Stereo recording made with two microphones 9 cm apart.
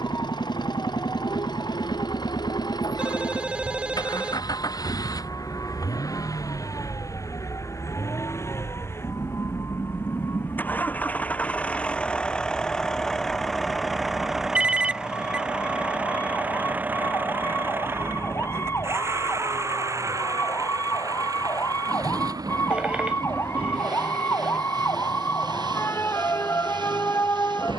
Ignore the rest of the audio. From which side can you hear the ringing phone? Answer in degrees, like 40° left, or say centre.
10° right.